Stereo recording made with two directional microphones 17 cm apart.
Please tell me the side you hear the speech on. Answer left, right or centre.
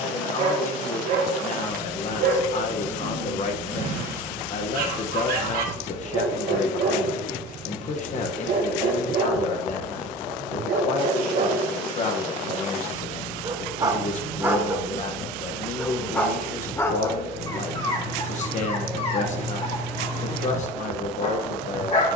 left.